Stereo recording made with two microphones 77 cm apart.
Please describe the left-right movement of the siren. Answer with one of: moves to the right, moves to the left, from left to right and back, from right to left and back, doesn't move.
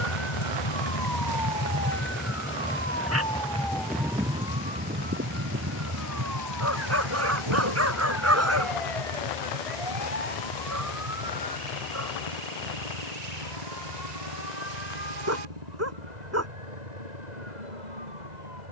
moves to the right.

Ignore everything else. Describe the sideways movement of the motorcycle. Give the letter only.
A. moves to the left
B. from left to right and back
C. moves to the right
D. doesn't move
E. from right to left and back
C.